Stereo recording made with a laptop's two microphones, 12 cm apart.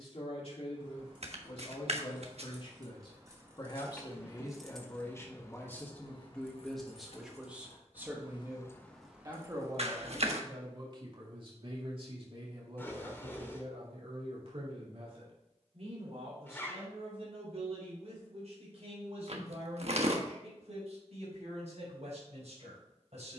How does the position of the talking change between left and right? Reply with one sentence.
In this clip you hear the talking go from the left side to the right.